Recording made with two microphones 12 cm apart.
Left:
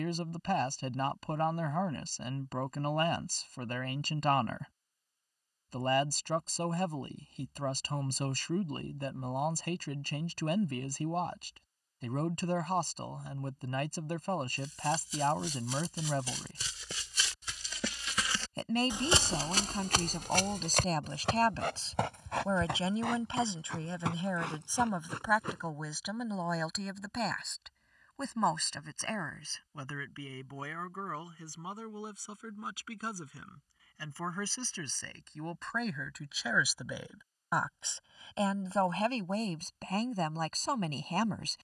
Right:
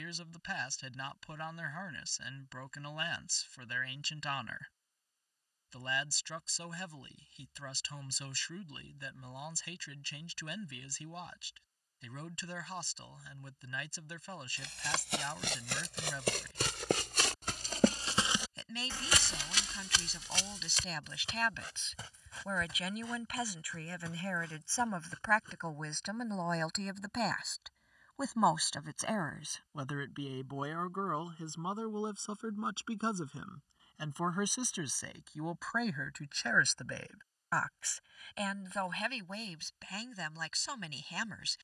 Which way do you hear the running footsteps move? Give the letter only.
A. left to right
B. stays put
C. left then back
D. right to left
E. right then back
D.